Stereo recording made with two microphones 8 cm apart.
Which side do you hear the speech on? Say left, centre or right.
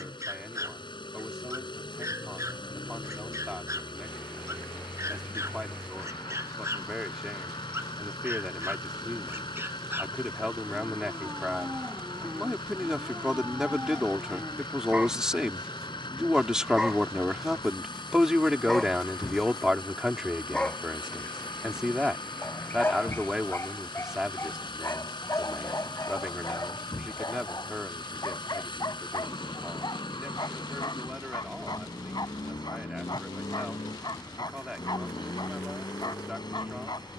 centre.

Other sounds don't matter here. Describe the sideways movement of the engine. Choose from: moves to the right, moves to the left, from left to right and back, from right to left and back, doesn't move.
doesn't move.